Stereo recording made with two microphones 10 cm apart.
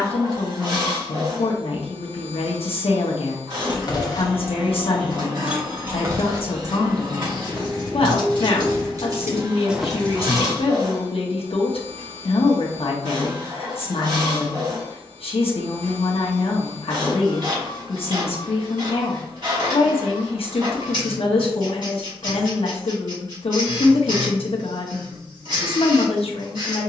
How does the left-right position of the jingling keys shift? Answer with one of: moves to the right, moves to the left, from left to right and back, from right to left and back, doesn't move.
from left to right and back.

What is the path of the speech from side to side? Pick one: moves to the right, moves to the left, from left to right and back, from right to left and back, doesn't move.
doesn't move.